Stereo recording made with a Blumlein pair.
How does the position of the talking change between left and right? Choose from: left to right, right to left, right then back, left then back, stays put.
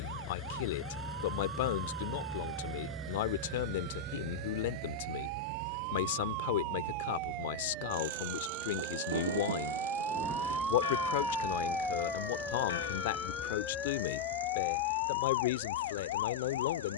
stays put.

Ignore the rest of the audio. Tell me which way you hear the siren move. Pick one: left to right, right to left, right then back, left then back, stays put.
right to left.